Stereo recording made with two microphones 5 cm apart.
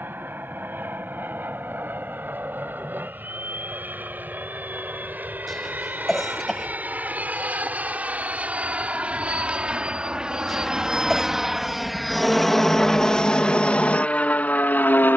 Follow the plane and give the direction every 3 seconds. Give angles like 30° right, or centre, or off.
50° right, 40° right, 30° right, 20° right, 20° left.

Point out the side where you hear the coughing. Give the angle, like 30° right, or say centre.
centre.